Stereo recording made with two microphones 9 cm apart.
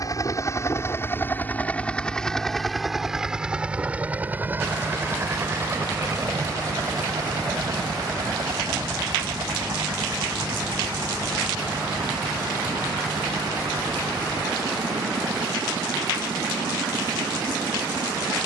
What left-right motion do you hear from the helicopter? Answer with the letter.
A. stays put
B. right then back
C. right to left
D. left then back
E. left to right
E.